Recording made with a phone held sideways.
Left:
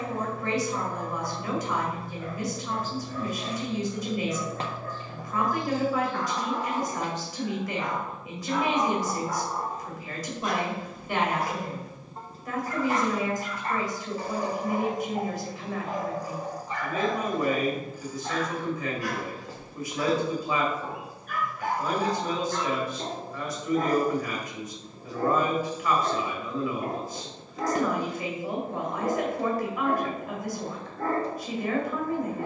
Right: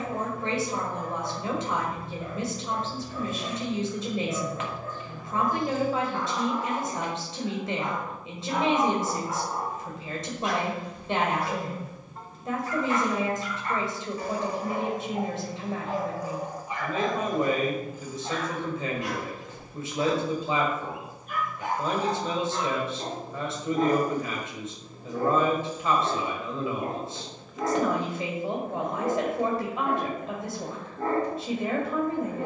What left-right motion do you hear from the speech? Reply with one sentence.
In this clip you hear the speech stay put.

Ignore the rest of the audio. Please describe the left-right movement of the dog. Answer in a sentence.
In this clip you hear the dog go left and come back.